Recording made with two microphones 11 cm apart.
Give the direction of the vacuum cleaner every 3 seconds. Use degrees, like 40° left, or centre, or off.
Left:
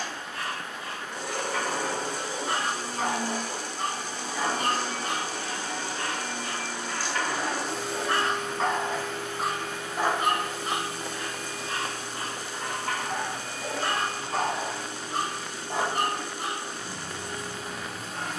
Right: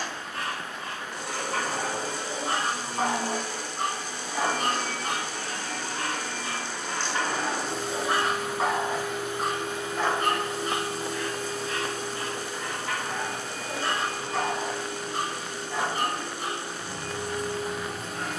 50° left, 40° left, centre, 30° right, 50° right, 60° right.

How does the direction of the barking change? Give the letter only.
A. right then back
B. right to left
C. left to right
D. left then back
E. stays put
B.